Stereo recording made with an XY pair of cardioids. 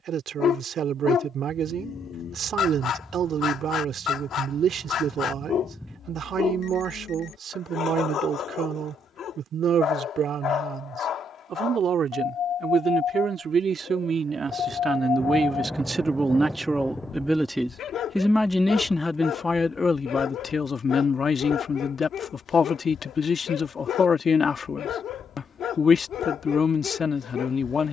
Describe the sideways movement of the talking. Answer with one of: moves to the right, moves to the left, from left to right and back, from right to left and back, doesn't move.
moves to the left.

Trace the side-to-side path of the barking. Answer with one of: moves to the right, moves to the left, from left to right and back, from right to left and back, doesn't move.
doesn't move.